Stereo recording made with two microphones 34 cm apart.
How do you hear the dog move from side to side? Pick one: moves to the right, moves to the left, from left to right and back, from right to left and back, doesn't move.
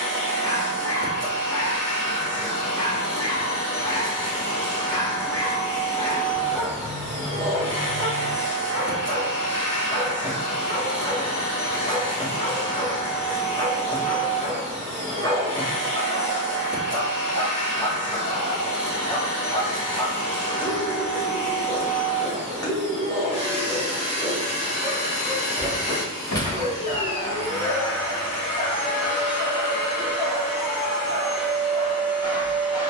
doesn't move.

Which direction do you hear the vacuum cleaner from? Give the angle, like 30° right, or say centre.
30° right.